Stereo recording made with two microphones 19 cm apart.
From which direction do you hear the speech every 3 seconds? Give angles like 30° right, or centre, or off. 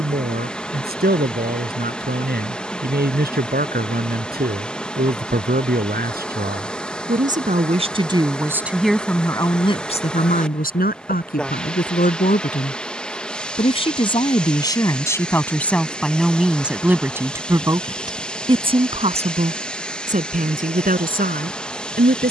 50° right, 50° right, 30° right, 40° left, 30° left, centre, 40° right, 50° right.